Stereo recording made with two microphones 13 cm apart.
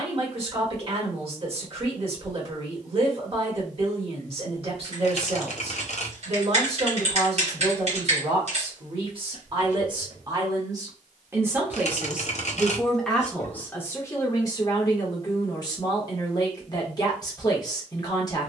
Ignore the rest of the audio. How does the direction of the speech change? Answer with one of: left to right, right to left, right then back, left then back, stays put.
right to left.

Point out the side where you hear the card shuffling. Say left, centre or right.
left.